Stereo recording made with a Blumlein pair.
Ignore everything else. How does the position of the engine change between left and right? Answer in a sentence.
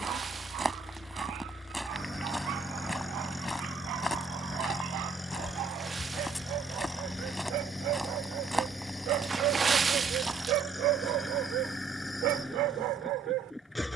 You can hear the engine stay put.